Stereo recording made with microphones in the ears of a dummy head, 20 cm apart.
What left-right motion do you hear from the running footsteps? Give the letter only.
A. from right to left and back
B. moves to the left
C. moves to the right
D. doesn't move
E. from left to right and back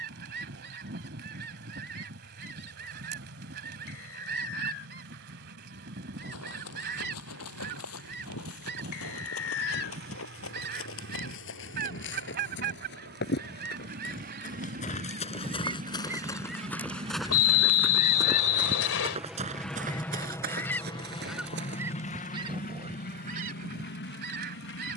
C.